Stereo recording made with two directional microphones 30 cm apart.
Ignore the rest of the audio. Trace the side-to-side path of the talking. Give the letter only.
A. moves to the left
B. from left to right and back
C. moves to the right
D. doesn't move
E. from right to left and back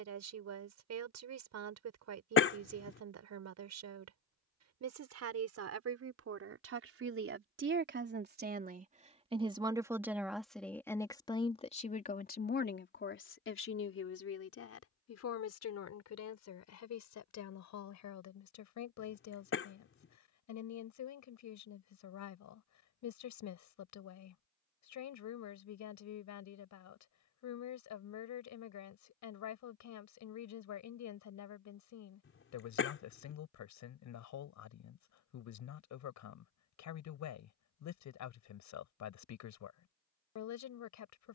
A.